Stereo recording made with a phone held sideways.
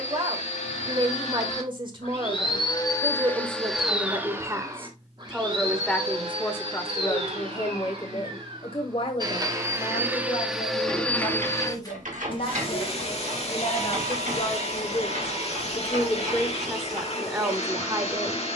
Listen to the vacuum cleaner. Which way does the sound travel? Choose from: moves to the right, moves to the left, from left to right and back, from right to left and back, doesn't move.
from left to right and back.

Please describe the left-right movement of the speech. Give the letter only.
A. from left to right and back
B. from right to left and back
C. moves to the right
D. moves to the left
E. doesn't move
B.